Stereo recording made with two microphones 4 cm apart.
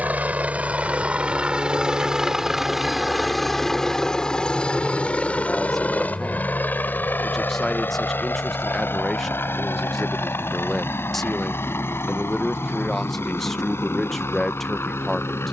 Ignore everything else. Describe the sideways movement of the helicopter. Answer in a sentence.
In this clip you hear the helicopter travel towards the left.